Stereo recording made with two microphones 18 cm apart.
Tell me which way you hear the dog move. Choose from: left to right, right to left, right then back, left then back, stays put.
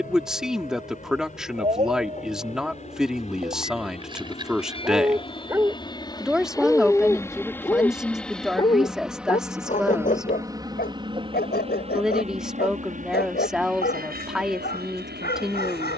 right to left.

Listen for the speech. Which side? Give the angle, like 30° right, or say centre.
centre.